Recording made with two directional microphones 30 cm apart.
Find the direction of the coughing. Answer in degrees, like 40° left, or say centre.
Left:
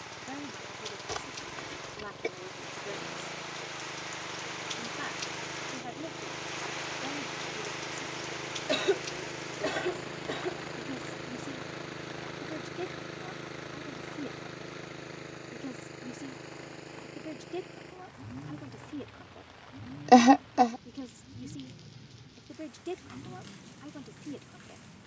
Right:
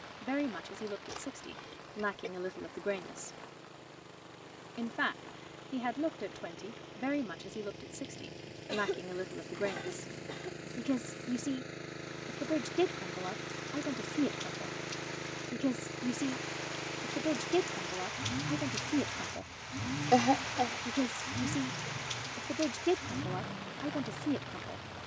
50° left.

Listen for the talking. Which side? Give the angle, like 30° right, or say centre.
60° right.